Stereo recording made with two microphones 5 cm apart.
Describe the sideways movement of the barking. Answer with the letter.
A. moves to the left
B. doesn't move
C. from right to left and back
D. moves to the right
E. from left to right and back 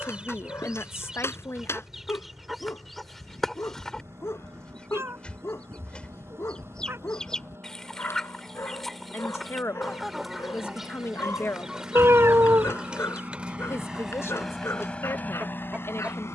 B.